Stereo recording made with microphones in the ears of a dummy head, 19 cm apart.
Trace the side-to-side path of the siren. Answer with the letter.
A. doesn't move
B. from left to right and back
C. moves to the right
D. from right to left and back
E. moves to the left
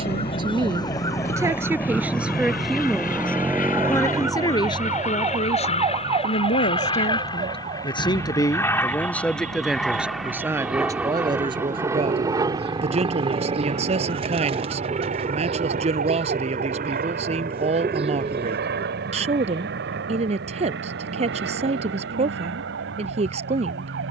C.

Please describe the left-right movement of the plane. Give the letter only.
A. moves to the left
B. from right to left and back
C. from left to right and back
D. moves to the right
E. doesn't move
D.